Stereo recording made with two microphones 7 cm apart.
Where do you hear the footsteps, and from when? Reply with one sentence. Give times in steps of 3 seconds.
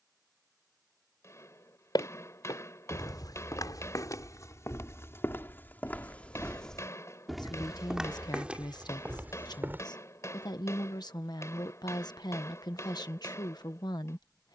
In this clip you hear the footsteps on the left from 0 s, in the centre from 6 s, on the right from 9 s and not at all from 12 s.